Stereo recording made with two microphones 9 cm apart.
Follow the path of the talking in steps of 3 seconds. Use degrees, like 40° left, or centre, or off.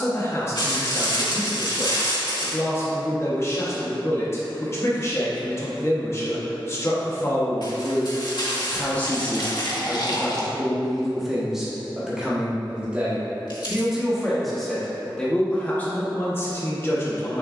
30° left, 30° left, 30° left, centre, 10° right, 20° left.